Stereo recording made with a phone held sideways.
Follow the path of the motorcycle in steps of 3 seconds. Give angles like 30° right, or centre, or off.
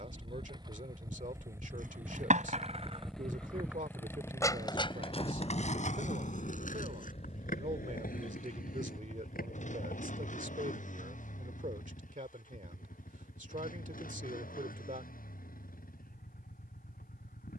20° right, 20° left, 40° left, 50° left, 60° left, 70° left.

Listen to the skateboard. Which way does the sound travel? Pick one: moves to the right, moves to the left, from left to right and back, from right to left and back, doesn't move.
moves to the left.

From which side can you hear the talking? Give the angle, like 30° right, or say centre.
60° right.